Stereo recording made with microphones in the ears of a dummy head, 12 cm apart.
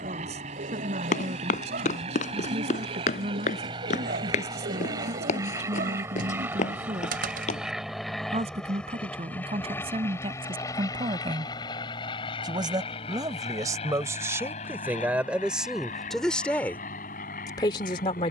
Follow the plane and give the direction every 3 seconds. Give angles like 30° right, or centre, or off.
40° right, 30° right, centre, 20° left, 40° left, 50° left.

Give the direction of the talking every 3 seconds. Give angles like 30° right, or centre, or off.
50° right, 50° right, 40° right, 40° right, 20° right, 10° left.